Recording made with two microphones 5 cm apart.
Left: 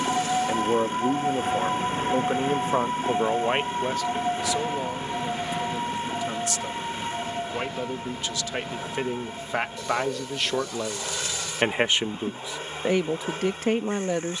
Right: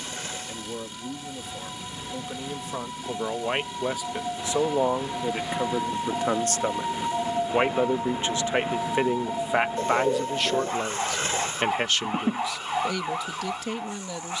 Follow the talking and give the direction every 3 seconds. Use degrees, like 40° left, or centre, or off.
50° left, 20° right, 30° right, centre, 40° left.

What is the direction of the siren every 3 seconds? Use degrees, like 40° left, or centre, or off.
50° left, 20° left, 20° right, 40° right, 50° right.